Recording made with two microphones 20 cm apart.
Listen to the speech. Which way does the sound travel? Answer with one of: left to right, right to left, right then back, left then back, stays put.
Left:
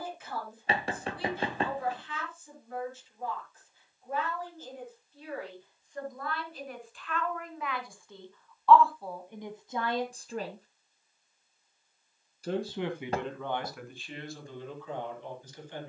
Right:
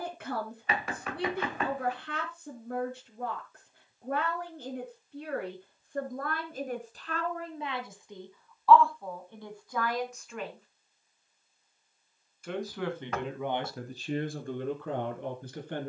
left then back.